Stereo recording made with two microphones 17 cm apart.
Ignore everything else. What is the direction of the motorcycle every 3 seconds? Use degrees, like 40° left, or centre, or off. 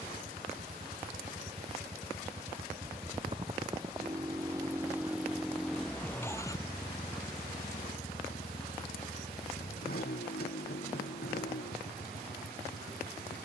50° right, 20° right, 30° left, 70° left, 80° left.